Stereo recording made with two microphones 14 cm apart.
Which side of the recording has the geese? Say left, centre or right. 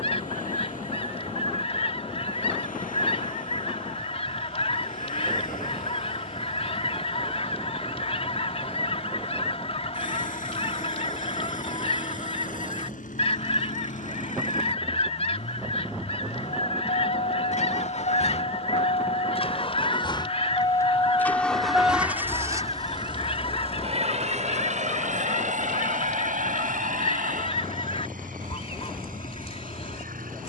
left.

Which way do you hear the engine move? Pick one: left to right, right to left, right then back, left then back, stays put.
left to right.